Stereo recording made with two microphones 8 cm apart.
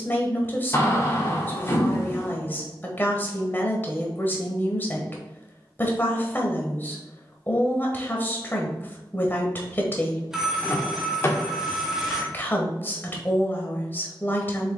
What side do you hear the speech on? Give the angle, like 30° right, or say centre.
20° left.